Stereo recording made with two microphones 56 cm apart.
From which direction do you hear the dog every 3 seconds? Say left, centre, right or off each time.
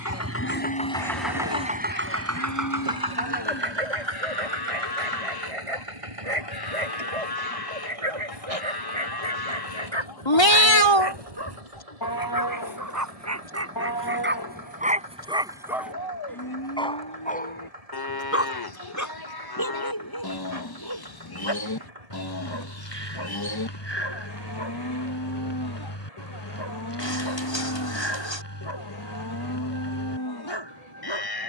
right, right, right, right, right, centre, left, left, left, left, left.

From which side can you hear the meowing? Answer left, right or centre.
left.